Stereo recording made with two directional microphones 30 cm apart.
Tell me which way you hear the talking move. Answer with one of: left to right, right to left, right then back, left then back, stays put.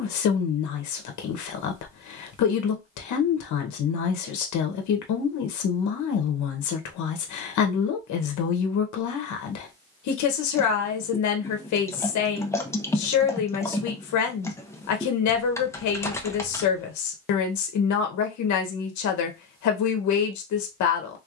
stays put.